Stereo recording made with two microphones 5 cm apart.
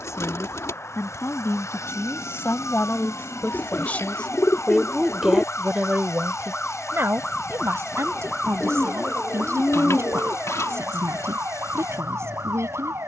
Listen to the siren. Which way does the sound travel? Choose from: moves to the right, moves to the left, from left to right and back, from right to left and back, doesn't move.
moves to the right.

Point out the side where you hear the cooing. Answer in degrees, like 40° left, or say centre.
80° left.